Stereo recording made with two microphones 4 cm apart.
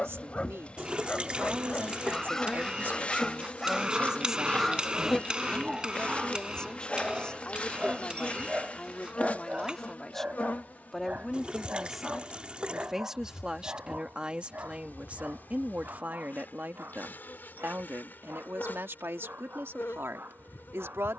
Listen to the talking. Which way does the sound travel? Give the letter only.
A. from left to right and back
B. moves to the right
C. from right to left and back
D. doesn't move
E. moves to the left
C.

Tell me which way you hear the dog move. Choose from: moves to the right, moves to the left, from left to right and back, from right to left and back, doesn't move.
moves to the right.